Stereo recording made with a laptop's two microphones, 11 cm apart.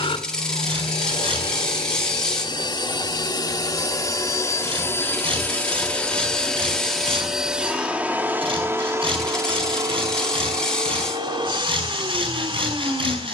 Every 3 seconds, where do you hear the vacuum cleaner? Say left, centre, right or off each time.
left, left, centre, right, right.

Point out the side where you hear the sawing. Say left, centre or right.
right.